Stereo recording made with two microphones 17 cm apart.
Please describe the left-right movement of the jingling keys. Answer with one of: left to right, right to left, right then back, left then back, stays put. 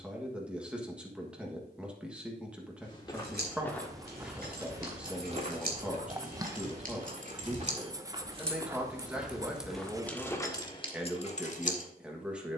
right to left.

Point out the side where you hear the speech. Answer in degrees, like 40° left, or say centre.
10° right.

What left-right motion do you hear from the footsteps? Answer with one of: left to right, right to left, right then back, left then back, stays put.
right then back.